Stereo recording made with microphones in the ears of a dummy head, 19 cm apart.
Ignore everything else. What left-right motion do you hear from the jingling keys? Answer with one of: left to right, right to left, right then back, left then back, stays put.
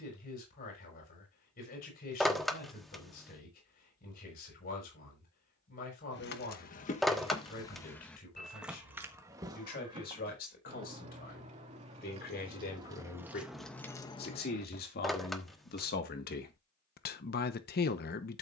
right then back.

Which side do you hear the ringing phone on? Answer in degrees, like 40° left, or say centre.
centre.